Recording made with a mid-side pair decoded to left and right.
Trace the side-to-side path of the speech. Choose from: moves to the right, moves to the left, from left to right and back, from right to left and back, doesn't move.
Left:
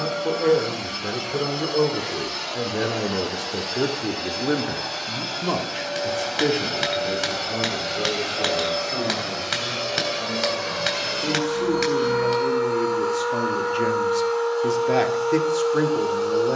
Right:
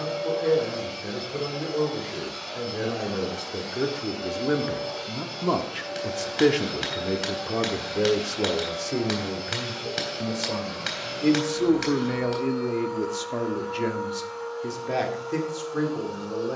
from left to right and back.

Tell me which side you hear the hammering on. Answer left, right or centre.
left.